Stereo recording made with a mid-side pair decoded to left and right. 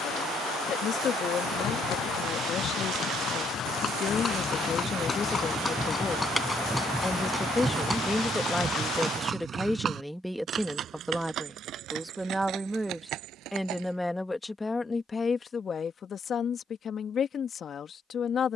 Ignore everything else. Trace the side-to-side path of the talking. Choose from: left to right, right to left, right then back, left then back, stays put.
right then back.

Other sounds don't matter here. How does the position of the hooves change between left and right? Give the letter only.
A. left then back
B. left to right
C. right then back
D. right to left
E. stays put
B.